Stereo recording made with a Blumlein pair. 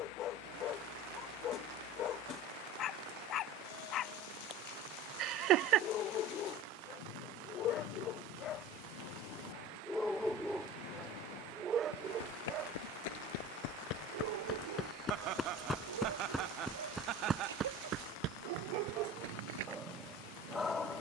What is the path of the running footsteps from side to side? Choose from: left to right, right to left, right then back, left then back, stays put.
left to right.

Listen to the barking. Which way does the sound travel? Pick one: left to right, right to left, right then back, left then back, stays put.
right then back.